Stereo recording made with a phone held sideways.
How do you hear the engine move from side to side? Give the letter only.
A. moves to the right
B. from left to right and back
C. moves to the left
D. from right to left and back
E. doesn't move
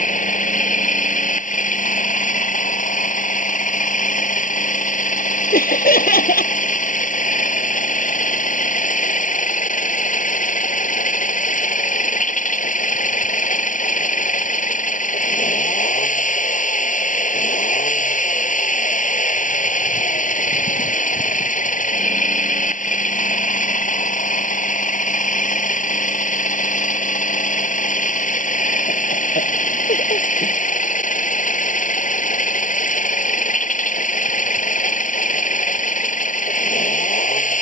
E.